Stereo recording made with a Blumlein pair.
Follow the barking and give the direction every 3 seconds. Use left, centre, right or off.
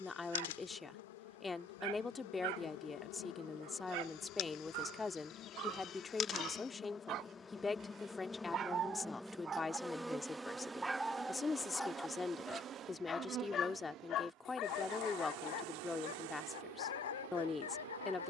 right, right, right, centre, left, left.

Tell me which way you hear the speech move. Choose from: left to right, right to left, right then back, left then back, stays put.
stays put.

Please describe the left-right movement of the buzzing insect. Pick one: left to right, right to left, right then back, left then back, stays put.
left to right.